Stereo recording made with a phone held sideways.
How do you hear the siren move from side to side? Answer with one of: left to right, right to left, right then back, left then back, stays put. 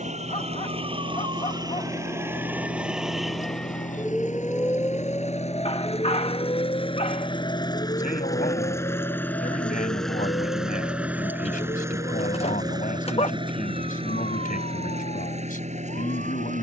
right to left.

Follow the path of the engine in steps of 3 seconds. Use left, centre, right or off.
left, left, left, centre, right, right.